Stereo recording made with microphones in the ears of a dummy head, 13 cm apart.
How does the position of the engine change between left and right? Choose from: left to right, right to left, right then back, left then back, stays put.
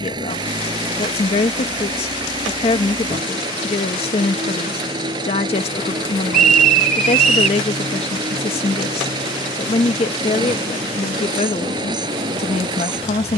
stays put.